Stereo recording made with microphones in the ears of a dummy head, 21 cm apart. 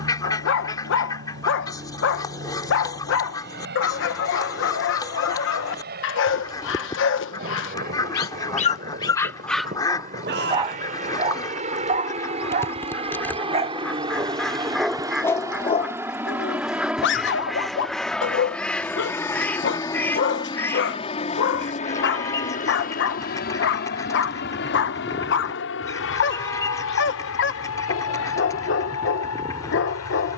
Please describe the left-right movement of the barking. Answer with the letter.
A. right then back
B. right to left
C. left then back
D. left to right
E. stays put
A.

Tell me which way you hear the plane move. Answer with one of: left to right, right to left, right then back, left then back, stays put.
right to left.